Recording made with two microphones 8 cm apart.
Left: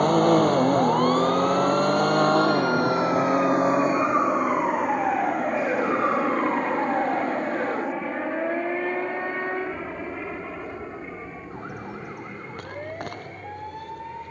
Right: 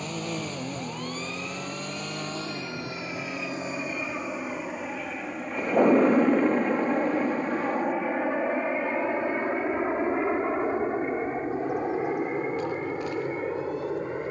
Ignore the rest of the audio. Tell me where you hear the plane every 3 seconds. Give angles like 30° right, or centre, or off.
50° left, 30° left, centre, 30° right, 40° right.